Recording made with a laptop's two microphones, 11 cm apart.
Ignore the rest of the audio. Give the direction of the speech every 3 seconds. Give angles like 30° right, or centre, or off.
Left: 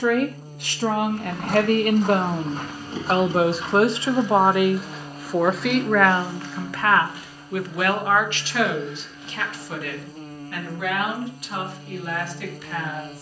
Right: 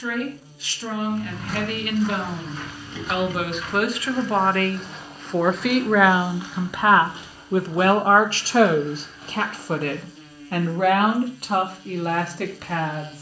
50° left, 20° left, 30° right, 50° right, 60° right.